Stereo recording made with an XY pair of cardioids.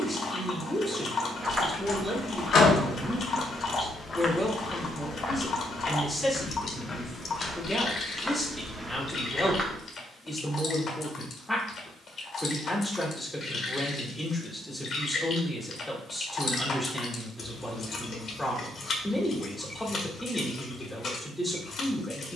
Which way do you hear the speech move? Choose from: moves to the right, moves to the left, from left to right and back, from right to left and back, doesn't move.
doesn't move.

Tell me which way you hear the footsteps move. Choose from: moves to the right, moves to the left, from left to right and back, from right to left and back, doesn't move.
from right to left and back.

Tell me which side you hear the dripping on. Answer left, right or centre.
left.